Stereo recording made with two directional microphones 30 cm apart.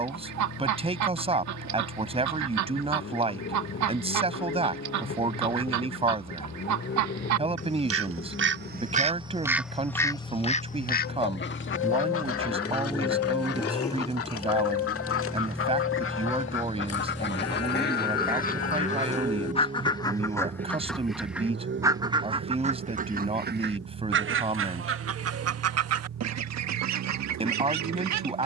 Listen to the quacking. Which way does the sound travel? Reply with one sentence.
In this clip you hear the quacking go left and come back.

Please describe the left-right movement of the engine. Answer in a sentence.
In this clip you hear the engine move from left to right.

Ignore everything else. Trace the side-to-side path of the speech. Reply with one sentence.
In this clip you hear the speech stay in one place.